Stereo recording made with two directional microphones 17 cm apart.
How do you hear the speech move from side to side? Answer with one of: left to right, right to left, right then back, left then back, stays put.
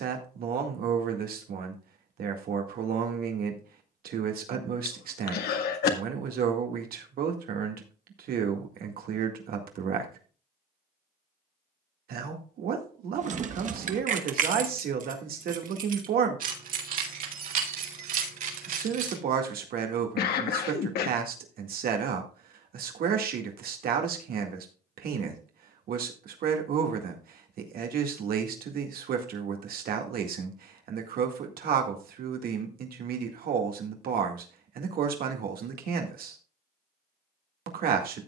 stays put.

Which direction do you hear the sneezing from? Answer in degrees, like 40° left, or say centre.
70° left.